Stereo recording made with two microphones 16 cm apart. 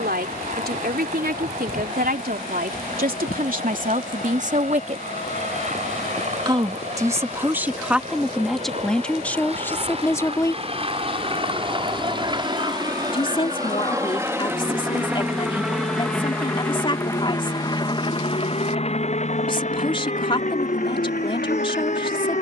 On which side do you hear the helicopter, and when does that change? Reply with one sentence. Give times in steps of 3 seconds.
You can hear the helicopter on the right from 0 s, in the centre from 15 s and on the left from 18 s.